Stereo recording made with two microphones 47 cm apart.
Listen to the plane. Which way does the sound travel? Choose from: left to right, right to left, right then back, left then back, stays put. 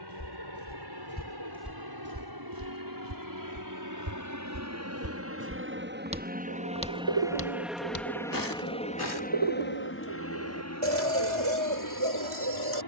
right to left.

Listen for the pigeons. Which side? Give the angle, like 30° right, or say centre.
80° right.